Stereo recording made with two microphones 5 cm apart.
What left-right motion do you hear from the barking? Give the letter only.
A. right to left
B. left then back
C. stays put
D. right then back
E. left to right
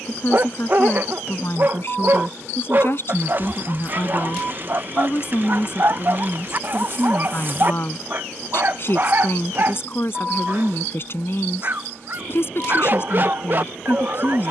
C.